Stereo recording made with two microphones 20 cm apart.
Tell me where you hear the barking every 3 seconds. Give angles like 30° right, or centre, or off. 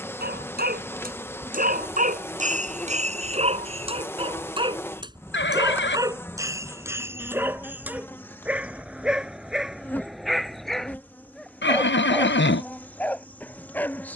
50° right, 30° right, 10° right, centre, 10° left.